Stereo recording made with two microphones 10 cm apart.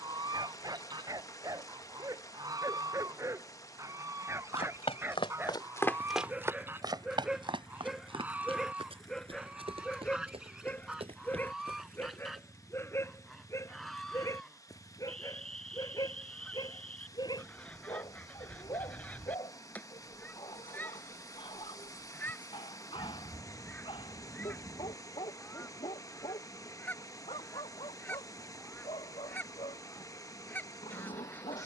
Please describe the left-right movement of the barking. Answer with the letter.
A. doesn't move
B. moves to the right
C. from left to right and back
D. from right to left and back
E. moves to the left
E.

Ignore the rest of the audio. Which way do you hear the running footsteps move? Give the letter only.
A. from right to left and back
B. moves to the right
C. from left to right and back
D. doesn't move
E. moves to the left
B.